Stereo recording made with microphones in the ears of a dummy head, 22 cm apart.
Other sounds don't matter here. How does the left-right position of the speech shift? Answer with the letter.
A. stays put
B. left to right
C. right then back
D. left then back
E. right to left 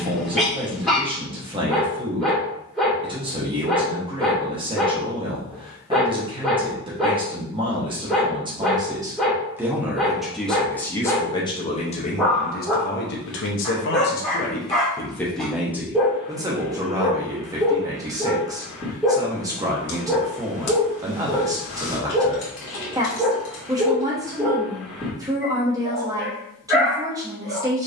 D.